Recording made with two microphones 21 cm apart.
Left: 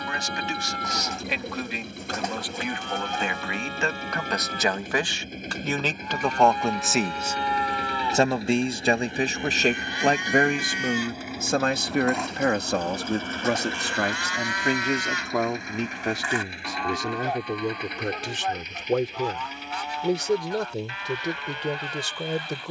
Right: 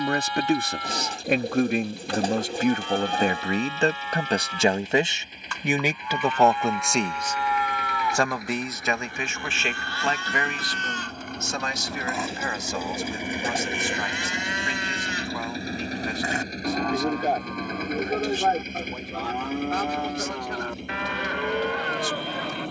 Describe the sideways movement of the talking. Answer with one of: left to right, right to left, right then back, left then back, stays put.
right to left.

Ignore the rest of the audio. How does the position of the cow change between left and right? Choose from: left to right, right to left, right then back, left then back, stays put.
left to right.